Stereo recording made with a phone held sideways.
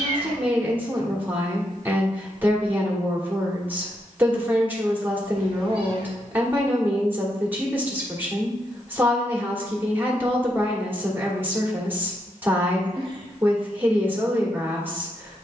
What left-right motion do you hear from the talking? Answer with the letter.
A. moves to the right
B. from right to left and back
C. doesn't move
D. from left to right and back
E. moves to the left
C.